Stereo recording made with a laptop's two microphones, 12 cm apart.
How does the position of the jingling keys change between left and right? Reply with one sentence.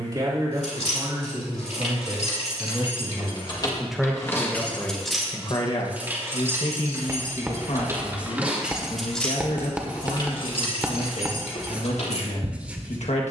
In this clip you hear the jingling keys move from left to right and back again.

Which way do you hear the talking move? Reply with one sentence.
You can hear the talking go from the right side to the left.